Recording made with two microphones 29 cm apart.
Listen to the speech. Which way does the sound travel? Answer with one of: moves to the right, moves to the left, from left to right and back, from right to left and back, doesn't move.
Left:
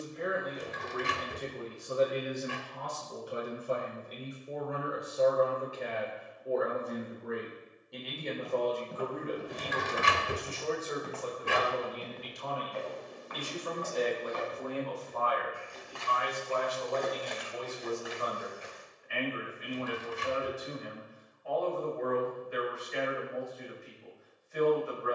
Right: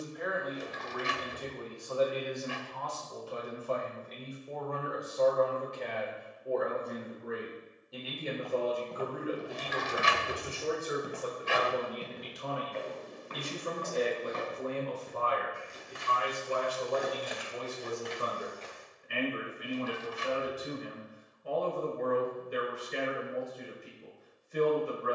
moves to the right.